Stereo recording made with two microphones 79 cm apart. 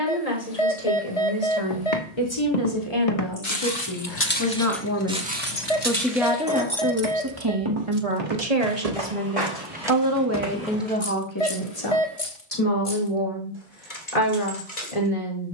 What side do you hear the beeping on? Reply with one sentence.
You can hear the beeping on the left.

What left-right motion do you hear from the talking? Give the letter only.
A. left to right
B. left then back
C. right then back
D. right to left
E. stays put
C.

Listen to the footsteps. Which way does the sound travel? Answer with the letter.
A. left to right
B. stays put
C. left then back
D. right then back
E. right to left
A.